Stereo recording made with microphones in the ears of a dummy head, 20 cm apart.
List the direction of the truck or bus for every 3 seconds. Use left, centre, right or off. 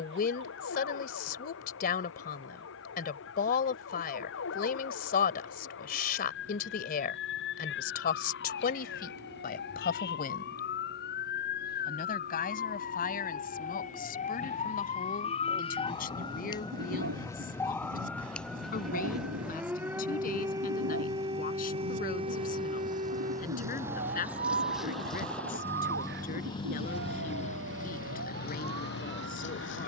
right, right, right, right, right, right, right, right, centre, left.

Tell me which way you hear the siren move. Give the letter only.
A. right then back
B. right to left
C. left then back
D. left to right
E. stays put
D.